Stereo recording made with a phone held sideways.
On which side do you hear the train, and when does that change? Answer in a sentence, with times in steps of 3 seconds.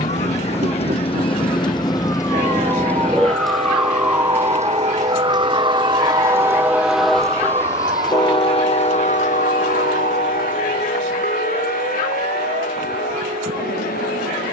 In this clip you hear the train on the right from 0 s, in the centre from 6 s and on the left from 9 s.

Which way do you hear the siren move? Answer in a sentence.
You can hear the siren move from left to right.